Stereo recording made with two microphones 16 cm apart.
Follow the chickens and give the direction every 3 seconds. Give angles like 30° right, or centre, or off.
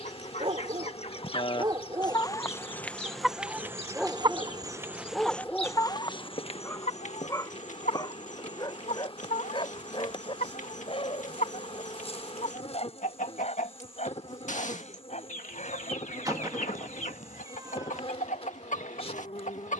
30° left, 10° right, 50° left, 50° left, 50° left, 50° left, 50° left.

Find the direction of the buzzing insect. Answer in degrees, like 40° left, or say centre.
40° left.